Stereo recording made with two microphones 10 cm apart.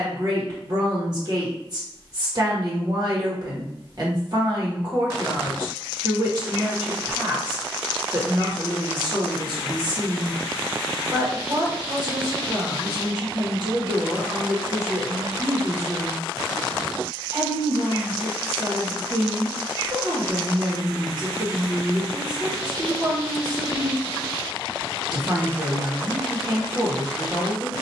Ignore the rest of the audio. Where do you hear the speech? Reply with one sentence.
You can hear the speech on the right.